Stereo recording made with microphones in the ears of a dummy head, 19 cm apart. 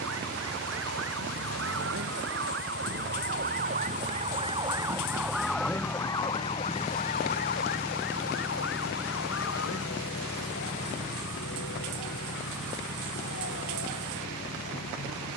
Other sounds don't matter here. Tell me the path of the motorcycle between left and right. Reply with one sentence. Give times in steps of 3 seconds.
In this clip you hear the motorcycle on the right from 0 s, in the centre from 6 s and on the left from 9 s.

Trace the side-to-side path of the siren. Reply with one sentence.
You can hear the siren travel towards the left.